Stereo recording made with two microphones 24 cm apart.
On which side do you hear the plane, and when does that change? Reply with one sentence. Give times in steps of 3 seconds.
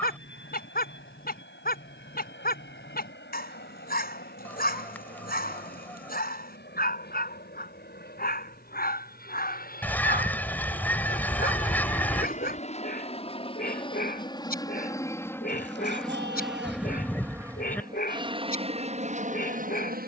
You can hear the plane on the left from 0 s, in the centre from 15 s and on the right from 18 s.